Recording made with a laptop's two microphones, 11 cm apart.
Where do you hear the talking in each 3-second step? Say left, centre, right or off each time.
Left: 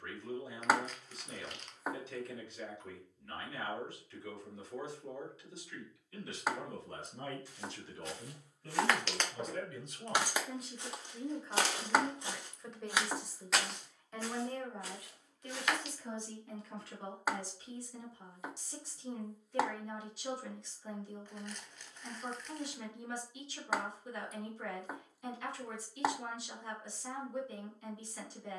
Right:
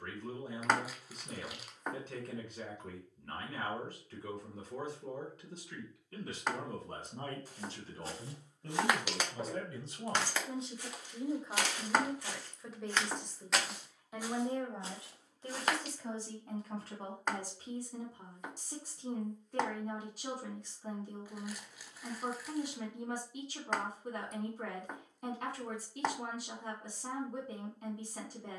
right, right, right, right, centre, right, right, right, right, right.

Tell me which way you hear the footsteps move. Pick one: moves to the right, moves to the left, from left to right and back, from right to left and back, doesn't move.
from right to left and back.